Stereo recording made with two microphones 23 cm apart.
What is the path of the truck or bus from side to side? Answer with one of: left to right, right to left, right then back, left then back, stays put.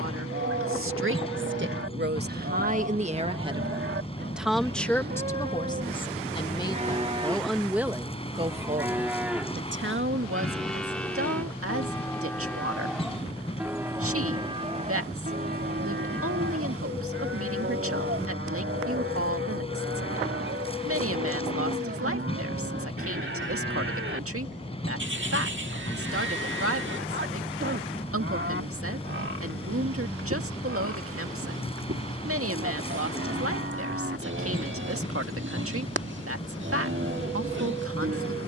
stays put.